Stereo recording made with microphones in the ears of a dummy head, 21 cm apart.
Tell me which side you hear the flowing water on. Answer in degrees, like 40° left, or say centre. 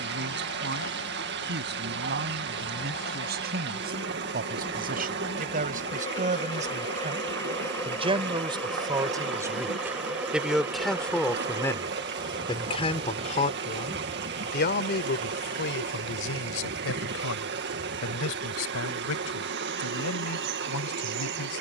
50° right.